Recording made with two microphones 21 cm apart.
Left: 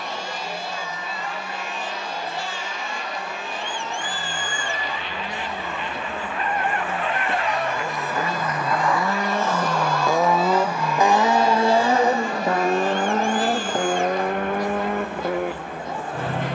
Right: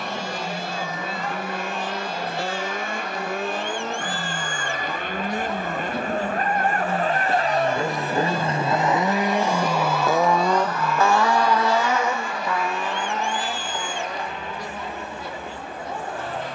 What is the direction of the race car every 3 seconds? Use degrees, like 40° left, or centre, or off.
70° right, 60° right, 40° right, 10° left, 50° left, 70° left.